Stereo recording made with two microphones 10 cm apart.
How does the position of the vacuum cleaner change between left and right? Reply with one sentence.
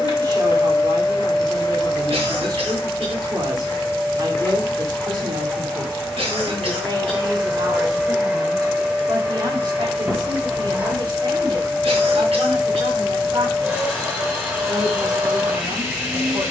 You can hear the vacuum cleaner travel towards the right.